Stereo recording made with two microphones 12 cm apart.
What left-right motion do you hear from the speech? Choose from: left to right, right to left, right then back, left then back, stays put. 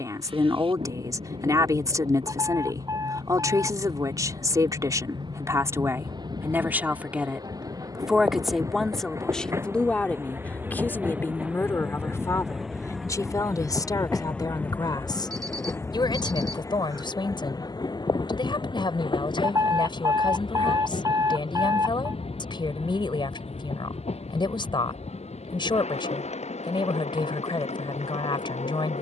right to left.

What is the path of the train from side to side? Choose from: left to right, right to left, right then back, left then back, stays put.
right to left.